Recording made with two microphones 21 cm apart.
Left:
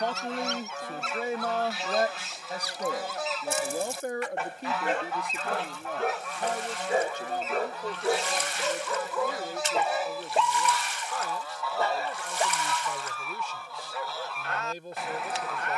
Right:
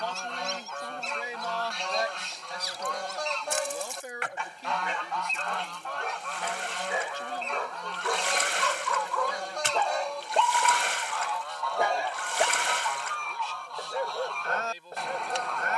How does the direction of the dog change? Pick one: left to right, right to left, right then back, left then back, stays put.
left to right.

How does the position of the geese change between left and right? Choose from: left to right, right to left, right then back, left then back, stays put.
stays put.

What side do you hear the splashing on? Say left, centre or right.
right.